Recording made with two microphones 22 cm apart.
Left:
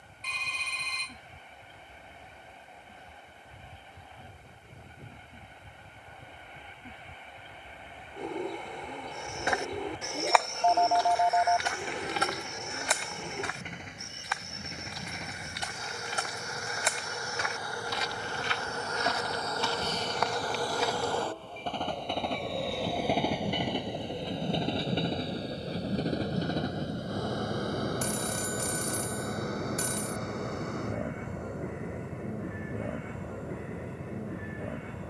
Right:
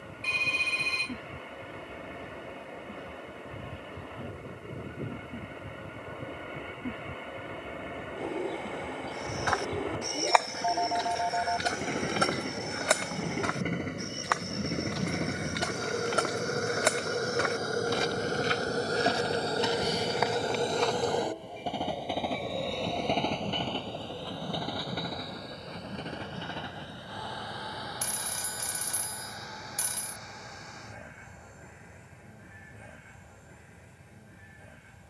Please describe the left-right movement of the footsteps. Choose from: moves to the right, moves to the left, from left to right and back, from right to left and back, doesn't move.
from left to right and back.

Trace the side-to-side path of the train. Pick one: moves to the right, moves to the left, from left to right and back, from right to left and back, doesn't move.
moves to the left.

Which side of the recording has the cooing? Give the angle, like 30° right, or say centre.
10° right.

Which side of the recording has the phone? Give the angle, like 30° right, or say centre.
50° left.